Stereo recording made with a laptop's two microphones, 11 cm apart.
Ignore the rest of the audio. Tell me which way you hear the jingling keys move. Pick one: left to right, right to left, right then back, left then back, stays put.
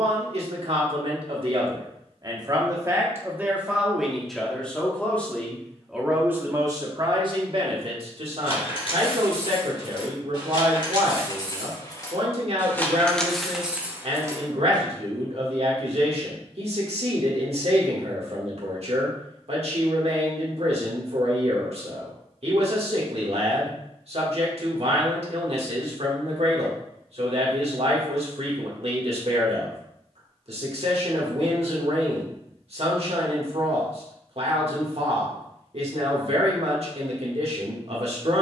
left to right.